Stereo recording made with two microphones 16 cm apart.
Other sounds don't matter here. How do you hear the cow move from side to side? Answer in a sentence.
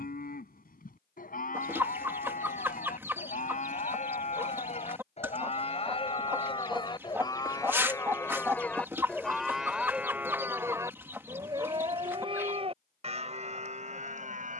You can hear the cow move to the right.